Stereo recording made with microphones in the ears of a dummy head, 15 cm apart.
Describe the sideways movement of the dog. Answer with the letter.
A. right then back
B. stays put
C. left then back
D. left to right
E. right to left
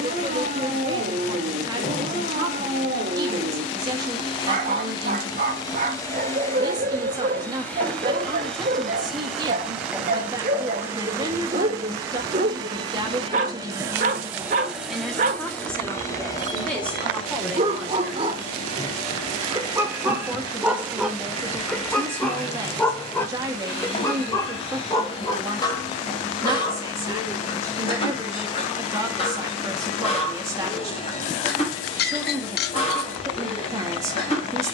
E.